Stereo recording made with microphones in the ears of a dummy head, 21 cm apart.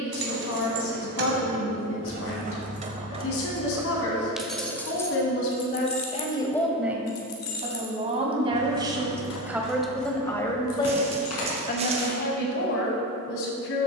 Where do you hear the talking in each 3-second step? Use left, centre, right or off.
left, left, centre, centre, left.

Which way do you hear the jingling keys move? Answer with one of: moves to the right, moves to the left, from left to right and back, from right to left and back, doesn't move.
moves to the left.